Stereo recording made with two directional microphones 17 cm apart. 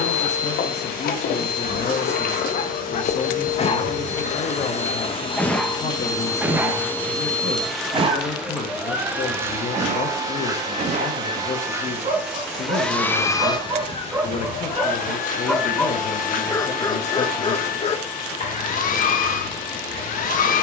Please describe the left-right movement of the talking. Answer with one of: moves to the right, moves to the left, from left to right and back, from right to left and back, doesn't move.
doesn't move.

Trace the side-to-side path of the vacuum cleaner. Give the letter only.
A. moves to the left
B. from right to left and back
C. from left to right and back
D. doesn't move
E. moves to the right
C.